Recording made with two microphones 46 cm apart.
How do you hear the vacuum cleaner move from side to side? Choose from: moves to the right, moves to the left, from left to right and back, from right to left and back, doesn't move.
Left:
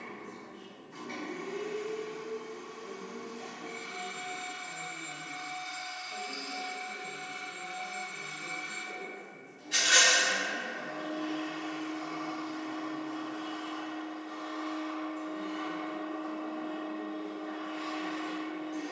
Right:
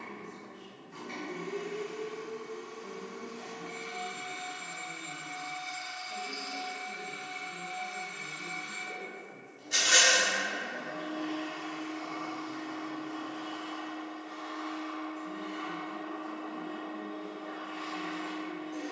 from right to left and back.